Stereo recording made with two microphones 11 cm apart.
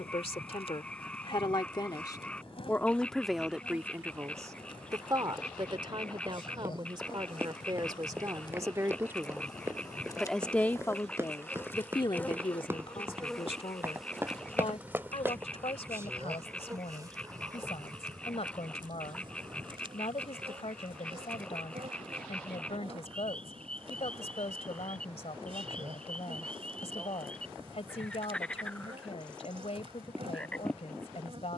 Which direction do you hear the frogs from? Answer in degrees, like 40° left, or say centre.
10° left.